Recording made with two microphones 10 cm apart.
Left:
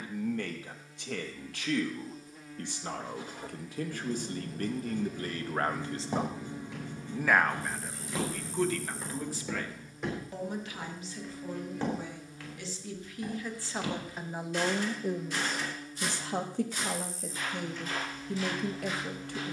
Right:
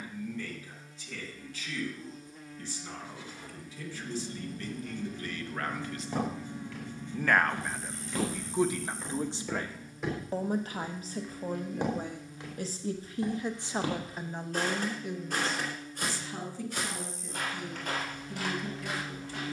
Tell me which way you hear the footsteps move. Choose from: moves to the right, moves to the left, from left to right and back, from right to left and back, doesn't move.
moves to the right.